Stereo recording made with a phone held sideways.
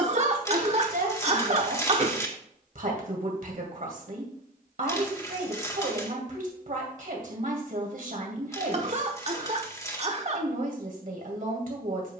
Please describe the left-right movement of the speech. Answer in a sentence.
You can hear the speech stay in one place.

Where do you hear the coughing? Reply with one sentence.
In this clip you hear the coughing on the right.